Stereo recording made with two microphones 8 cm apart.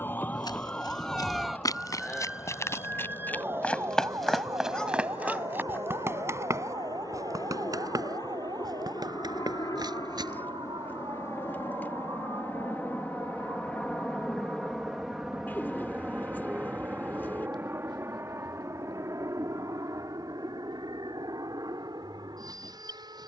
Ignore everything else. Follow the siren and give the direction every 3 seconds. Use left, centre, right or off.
centre, right, right, right, right, right, right, right.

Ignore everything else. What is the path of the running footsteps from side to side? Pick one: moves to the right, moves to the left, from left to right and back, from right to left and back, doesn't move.
moves to the right.